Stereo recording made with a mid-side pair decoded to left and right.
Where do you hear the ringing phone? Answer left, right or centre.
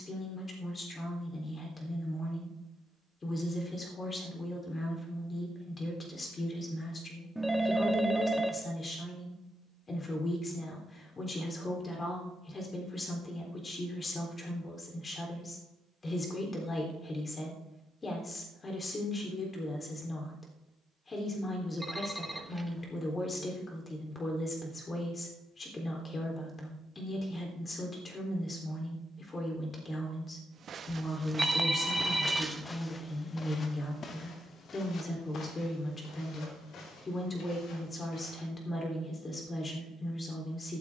centre.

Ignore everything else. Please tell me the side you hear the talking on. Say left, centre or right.
left.